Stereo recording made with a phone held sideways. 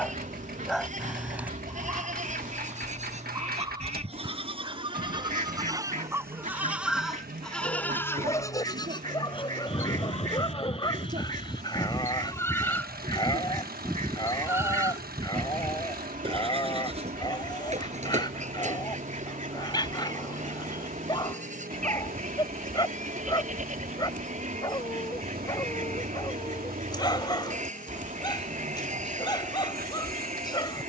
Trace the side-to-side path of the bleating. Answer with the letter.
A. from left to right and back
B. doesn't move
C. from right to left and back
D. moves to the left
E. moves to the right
C.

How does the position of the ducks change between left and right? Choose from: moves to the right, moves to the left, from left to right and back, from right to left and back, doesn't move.
doesn't move.